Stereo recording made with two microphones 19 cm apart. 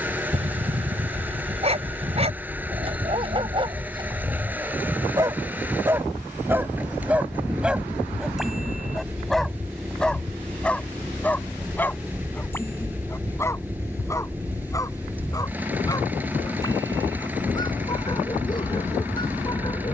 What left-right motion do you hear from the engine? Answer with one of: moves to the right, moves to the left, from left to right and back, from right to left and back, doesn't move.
doesn't move.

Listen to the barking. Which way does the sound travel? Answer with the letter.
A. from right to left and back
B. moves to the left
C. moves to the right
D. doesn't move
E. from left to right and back
B.